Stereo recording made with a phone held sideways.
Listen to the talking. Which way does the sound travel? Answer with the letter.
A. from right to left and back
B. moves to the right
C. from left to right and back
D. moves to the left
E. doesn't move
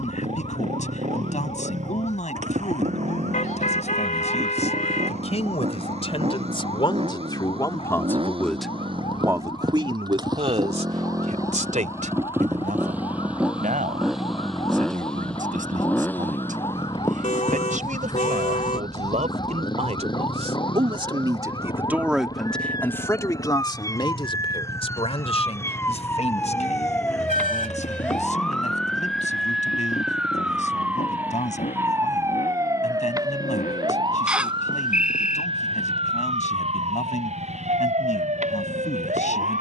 C.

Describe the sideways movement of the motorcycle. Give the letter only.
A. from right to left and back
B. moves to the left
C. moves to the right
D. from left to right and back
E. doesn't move
B.